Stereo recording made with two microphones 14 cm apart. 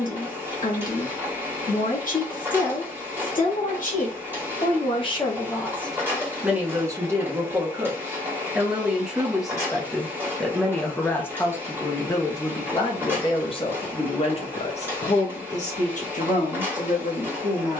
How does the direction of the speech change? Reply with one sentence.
You can hear the speech move from left to right and back again.